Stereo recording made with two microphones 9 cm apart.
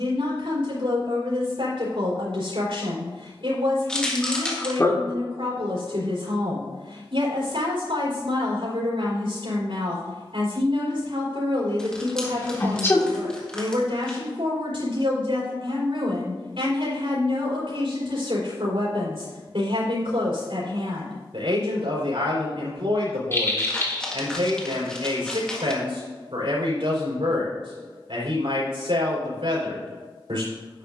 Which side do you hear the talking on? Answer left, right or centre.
right.